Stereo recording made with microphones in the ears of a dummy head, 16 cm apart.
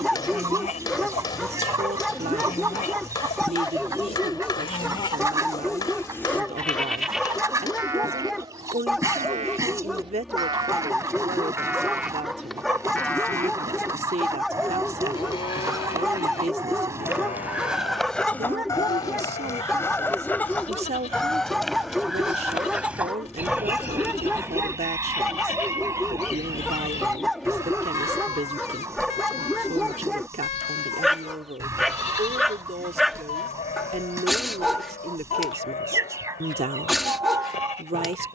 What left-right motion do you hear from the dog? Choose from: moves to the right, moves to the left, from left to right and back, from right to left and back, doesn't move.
doesn't move.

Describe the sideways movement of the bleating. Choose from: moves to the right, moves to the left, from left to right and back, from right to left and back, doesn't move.
from left to right and back.